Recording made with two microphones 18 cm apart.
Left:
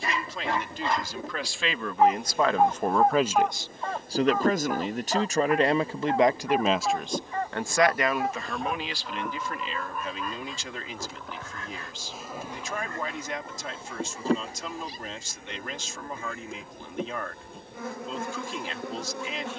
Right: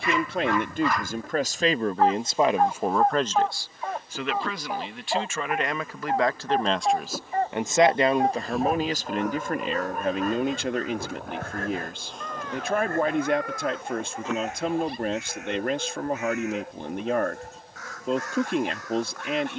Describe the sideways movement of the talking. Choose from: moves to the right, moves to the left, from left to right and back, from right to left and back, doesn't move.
from right to left and back.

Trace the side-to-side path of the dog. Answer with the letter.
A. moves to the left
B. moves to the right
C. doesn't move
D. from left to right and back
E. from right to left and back
B.